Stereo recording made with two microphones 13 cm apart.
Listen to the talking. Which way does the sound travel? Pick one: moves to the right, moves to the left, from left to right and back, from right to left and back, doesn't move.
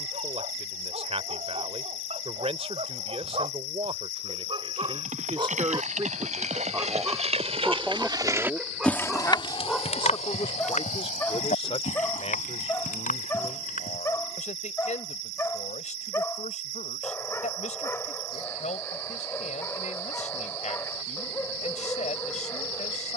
moves to the left.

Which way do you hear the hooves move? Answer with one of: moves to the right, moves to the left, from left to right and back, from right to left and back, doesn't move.
moves to the left.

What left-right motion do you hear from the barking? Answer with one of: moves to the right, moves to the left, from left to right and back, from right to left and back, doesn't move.
moves to the left.